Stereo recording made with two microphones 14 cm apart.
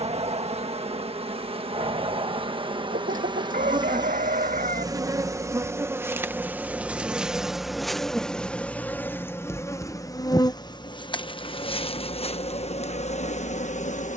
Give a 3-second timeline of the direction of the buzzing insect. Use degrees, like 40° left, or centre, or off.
40° right, 30° right, centre, 30° left, 50° left.